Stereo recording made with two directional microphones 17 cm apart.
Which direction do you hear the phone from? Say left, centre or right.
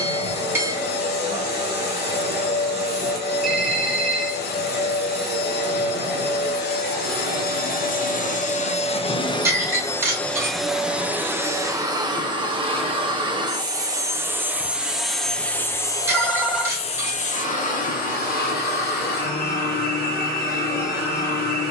centre.